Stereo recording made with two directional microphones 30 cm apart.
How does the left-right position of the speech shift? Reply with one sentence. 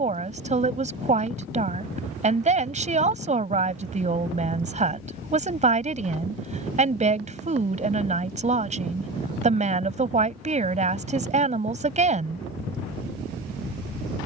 In this clip you hear the speech stay in one place.